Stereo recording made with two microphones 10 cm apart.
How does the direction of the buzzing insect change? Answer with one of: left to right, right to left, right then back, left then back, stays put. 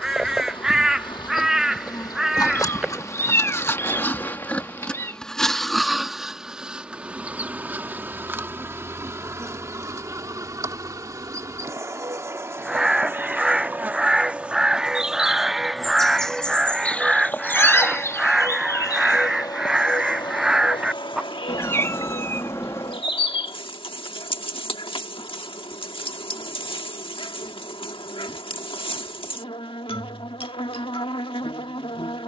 right then back.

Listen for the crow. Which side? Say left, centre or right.
centre.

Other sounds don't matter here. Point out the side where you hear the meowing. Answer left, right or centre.
left.